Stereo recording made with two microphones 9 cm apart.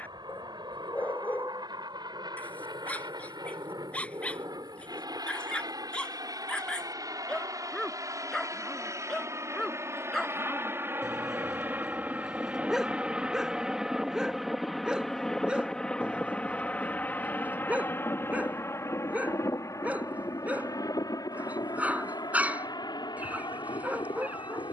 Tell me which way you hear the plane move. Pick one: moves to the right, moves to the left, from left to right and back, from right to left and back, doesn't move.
moves to the left.